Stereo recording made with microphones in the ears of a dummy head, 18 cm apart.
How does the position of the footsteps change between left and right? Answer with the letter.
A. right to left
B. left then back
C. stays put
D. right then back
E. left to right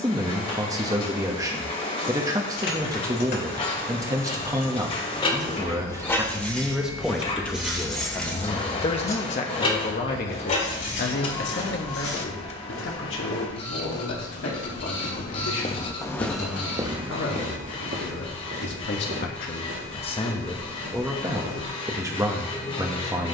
E.